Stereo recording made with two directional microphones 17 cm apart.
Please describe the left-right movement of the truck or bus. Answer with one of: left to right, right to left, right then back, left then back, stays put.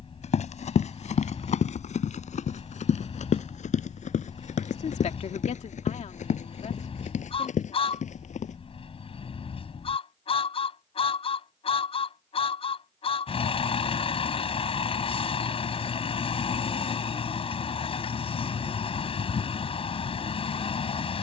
stays put.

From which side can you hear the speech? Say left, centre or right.
left.